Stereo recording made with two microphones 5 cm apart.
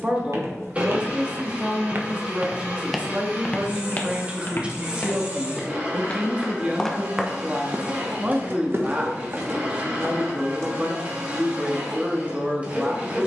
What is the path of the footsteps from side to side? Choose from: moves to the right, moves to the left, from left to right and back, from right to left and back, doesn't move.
from right to left and back.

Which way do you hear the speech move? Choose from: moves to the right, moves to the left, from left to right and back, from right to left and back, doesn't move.
doesn't move.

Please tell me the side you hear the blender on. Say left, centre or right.
right.